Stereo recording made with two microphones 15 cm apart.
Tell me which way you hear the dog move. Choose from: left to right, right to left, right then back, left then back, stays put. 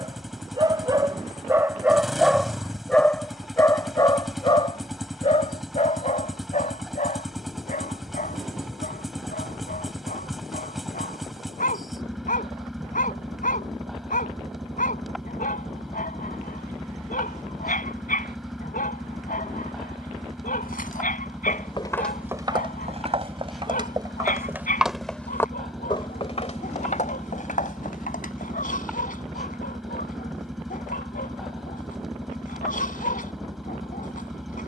right to left.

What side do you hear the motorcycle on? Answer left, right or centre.
centre.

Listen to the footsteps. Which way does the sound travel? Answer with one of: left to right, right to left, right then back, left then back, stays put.
right then back.